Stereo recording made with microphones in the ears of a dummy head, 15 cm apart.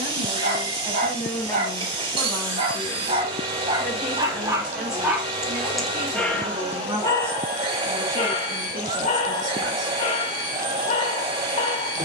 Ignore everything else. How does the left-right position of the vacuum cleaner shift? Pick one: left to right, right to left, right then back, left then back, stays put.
stays put.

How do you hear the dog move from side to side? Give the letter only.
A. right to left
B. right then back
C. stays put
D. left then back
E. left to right
A.